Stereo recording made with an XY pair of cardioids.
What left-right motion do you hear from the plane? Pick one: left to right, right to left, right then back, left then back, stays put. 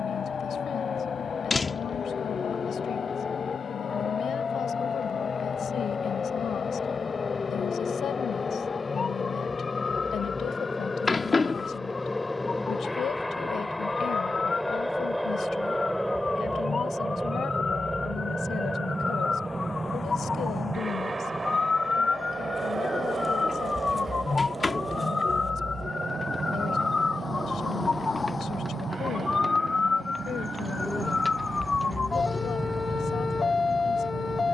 left to right.